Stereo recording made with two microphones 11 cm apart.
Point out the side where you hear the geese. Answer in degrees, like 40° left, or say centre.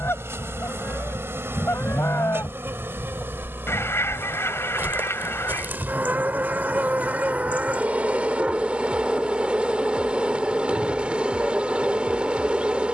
20° left.